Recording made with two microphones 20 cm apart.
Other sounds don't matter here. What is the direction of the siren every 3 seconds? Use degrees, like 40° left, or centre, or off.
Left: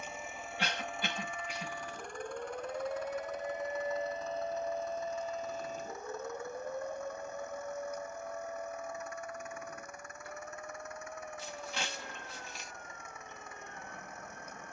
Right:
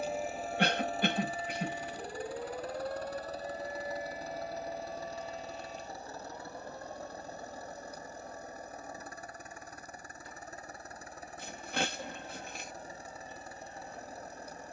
30° right, 30° left, 50° left, 60° left, 60° left.